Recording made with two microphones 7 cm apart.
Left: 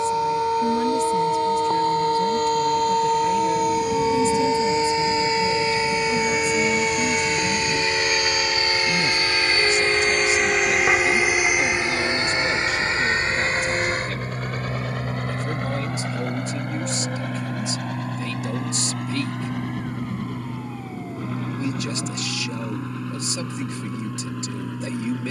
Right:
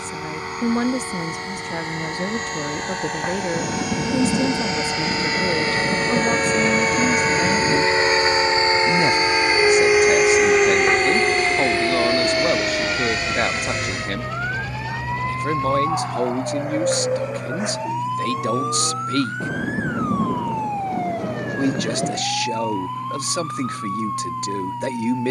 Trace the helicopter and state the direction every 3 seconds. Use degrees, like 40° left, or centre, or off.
70° right, 60° right, 40° right, centre, 30° left, 50° left, 60° left, 70° left, 70° left.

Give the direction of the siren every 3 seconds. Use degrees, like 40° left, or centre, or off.
60° left, 40° left, 10° right, 50° right, 60° right, 70° right, 70° right, 80° right, 80° right.